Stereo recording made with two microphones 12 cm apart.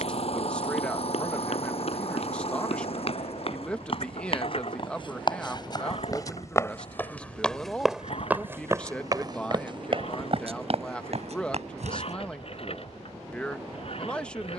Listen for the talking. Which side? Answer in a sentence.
You can hear the talking in the centre.